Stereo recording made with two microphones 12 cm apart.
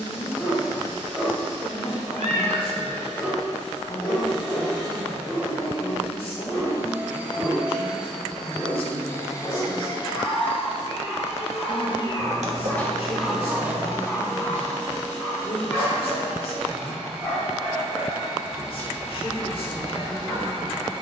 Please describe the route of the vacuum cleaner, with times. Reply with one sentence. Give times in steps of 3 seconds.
You can hear the vacuum cleaner on the right from 0 s, in the centre from 6 s, on the left from 9 s, in the centre from 12 s and on the right from 15 s.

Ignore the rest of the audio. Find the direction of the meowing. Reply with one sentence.
You can hear the meowing on the right.